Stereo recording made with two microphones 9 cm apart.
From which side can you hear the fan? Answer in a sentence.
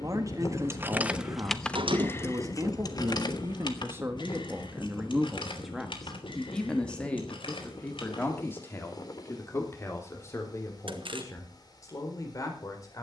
In this clip you hear the fan on the left.